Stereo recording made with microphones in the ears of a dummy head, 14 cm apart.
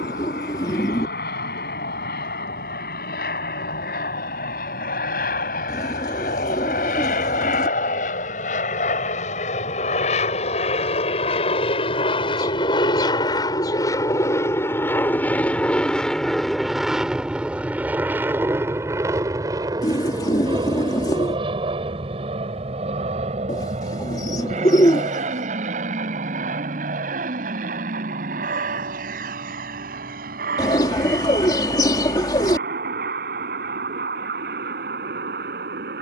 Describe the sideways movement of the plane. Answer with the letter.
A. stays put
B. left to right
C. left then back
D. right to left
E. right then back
B.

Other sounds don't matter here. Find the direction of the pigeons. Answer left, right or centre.
left.